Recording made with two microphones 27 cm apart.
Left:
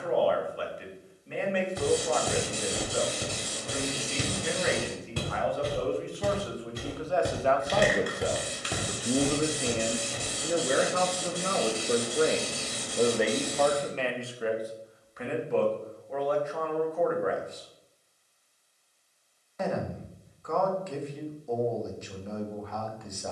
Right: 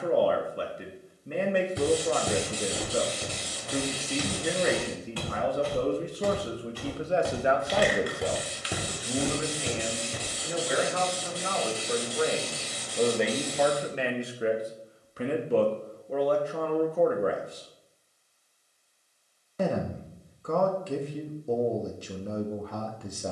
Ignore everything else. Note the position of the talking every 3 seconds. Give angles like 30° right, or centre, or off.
50° right, 50° right, 20° right, 40° left, centre, 40° right, 40° right, 40° right.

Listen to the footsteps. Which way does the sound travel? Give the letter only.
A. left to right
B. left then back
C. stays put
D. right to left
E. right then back
B.